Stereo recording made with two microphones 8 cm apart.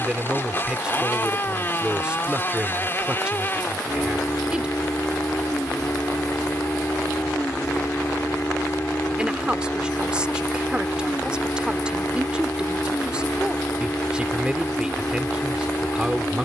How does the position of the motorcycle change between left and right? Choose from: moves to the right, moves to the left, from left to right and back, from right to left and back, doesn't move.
doesn't move.